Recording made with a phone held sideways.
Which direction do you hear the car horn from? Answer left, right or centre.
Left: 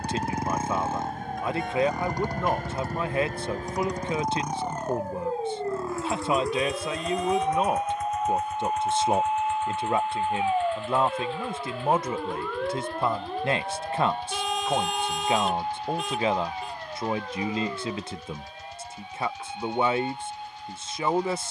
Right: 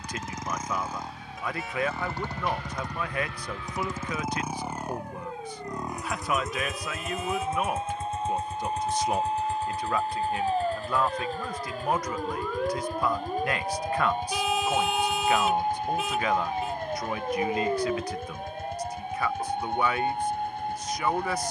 centre.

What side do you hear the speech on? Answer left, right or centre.
left.